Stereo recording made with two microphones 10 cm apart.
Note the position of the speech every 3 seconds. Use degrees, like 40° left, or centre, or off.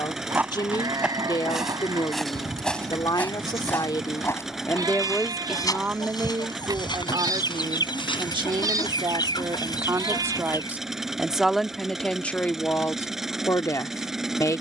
40° left, 20° left, 40° right, 20° right, 20° left.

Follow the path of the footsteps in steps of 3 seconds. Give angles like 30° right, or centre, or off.
centre, 30° left, 50° left, off, off.